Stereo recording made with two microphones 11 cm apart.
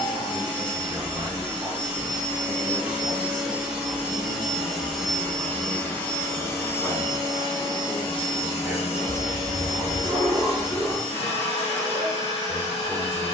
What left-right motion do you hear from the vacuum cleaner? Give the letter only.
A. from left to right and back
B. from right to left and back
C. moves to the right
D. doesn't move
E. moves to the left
E.